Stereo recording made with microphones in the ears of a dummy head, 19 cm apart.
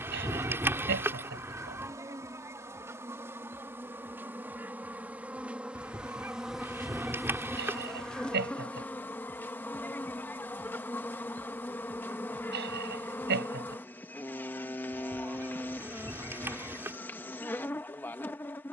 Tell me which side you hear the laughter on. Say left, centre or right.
right.